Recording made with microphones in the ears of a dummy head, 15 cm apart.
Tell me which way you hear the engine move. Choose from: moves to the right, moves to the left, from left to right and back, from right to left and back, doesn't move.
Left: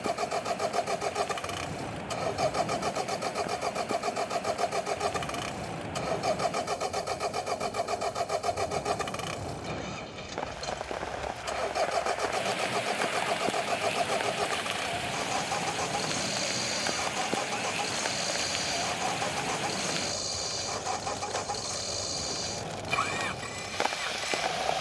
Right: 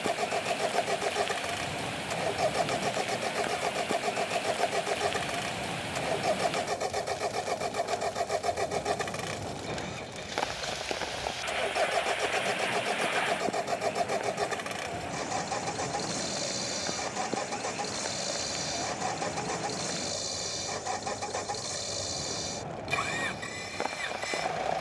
doesn't move.